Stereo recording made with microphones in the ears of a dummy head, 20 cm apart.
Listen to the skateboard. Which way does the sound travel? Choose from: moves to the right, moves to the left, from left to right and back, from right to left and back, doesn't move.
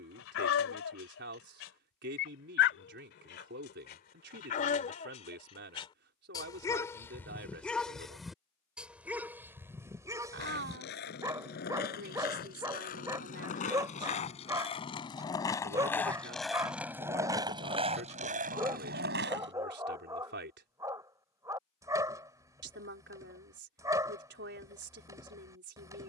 moves to the right.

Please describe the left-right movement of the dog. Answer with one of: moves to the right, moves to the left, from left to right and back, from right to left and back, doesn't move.
moves to the right.